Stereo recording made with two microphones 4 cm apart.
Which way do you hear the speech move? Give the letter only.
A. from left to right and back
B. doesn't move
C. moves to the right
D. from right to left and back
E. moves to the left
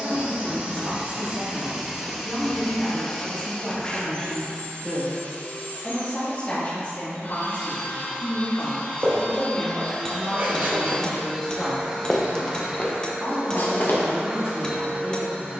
D.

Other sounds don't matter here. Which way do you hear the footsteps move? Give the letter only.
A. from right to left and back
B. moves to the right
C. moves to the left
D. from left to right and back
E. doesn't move
C.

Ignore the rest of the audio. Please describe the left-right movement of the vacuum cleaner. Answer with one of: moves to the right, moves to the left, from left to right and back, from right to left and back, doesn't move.
from right to left and back.